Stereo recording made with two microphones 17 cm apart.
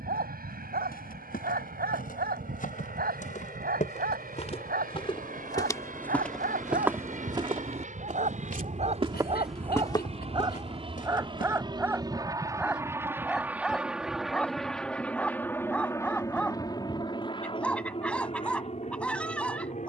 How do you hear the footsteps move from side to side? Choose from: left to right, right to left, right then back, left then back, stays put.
right then back.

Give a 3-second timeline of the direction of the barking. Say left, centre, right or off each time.
right, right, right, right, centre, centre, centre.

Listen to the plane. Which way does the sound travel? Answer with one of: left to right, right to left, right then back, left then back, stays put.
right to left.